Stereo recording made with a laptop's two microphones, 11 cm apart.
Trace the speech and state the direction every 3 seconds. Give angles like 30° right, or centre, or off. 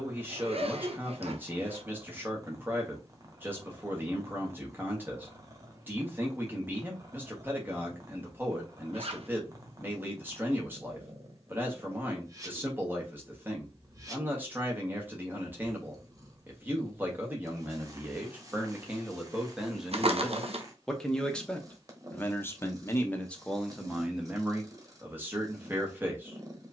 20° right, 20° right, 20° right, 20° right, 20° right, 20° right, 10° right, 10° left, 20° right.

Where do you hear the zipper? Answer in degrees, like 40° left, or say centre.
60° right.